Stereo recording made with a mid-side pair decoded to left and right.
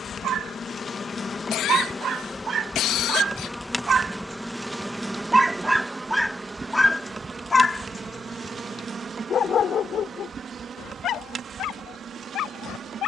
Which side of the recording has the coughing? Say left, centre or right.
left.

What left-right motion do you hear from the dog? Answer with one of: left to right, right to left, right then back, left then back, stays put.
right to left.